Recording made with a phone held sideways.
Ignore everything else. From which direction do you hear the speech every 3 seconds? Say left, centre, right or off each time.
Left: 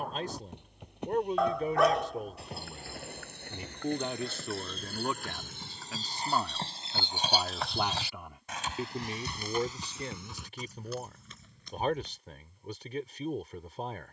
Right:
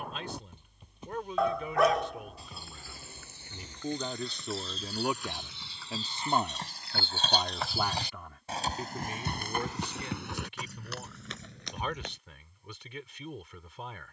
left, centre, centre, left, left.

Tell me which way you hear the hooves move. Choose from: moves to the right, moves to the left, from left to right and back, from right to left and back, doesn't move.
moves to the right.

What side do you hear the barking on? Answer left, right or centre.
centre.